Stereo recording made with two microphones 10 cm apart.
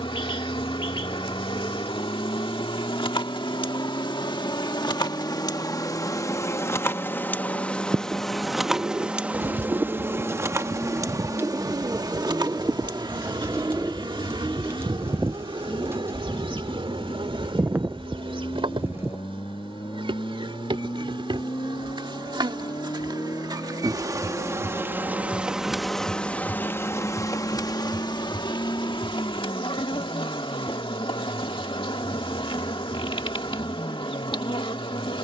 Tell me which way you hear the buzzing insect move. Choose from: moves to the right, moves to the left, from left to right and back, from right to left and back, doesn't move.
from left to right and back.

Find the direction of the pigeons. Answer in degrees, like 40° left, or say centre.
20° right.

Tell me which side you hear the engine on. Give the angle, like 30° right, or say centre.
60° left.